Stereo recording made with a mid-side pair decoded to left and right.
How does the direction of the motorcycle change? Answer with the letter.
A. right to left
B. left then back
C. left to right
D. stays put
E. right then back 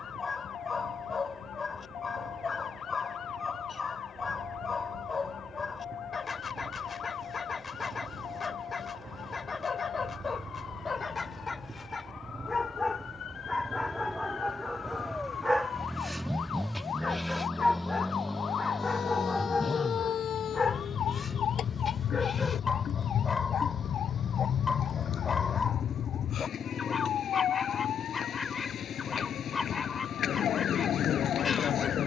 A.